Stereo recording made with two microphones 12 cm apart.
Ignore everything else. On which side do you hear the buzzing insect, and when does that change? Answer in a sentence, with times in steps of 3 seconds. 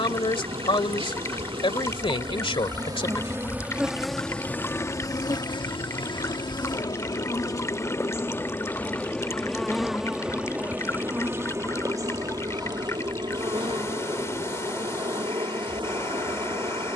You can hear the buzzing insect on the right from 0 s, in the centre from 3 s, on the left from 6 s, in the centre from 9 s and on the right from 12 s.